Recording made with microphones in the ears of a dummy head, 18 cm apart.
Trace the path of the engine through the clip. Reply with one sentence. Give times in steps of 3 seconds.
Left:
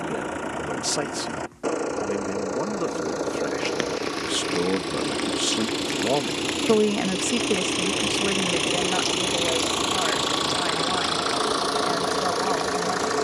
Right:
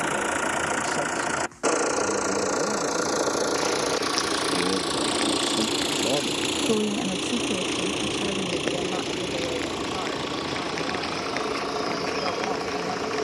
You can hear the engine on the right from 0 s, in the centre from 6 s and on the left from 9 s.